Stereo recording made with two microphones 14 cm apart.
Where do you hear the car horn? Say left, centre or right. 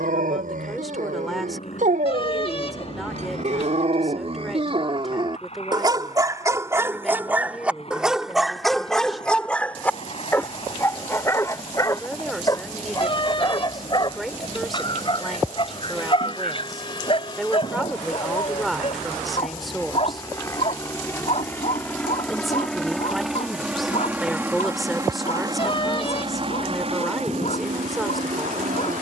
left.